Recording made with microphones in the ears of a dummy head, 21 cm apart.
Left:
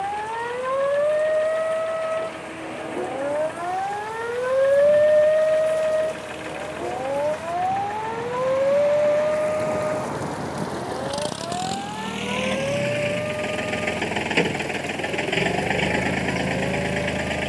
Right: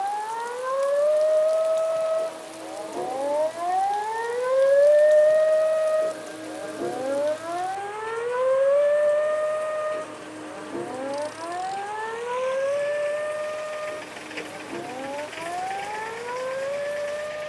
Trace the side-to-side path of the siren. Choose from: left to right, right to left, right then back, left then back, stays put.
left to right.